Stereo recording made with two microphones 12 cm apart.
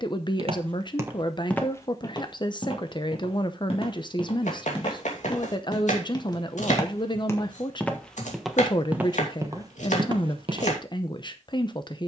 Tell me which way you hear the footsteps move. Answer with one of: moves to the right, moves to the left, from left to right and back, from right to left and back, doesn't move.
from right to left and back.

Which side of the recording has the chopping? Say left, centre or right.
left.